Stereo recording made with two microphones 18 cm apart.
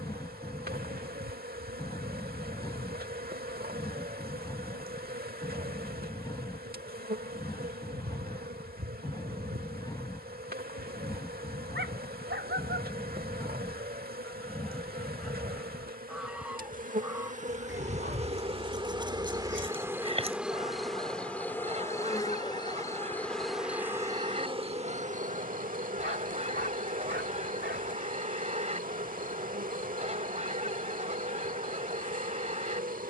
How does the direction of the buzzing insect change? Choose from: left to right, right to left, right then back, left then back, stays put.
left then back.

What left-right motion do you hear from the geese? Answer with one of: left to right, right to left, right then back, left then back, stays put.
left to right.